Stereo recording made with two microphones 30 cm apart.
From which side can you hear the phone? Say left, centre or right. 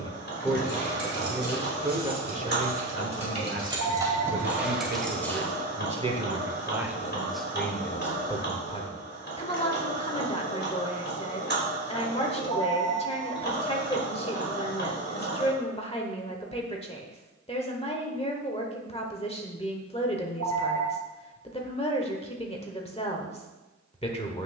right.